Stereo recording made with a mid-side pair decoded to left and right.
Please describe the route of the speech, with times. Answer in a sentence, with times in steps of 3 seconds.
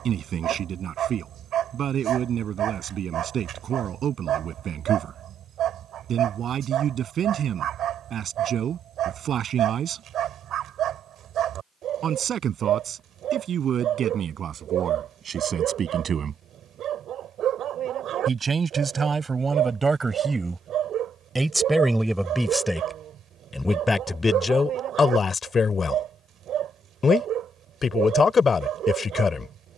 In this clip you hear the speech on the right from 0 s, in the centre from 21 s and on the left from 24 s.